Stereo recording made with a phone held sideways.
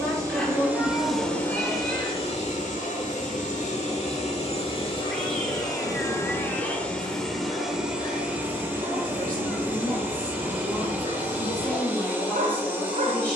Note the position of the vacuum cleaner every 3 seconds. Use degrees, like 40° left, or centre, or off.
20° left, 40° left, centre, 10° right, 10° right.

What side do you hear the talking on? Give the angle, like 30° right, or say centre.
10° left.